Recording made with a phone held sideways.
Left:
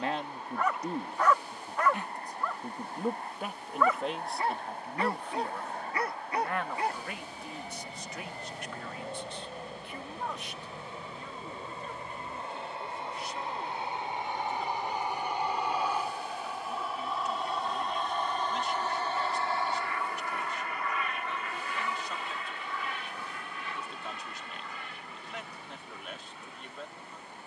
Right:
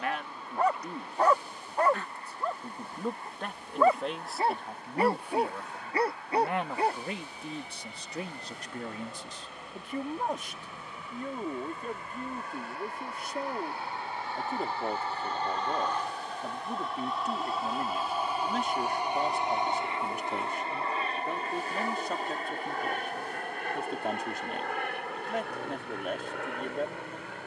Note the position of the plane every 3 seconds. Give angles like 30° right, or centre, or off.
50° left, 50° left, 40° left, 30° left, 20° left, 10° left, 20° right, 40° right, 60° right.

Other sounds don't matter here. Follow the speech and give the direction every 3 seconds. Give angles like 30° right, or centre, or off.
20° left, centre, 30° right, 50° right, 50° right, 50° right, 50° right, 50° right, 50° right.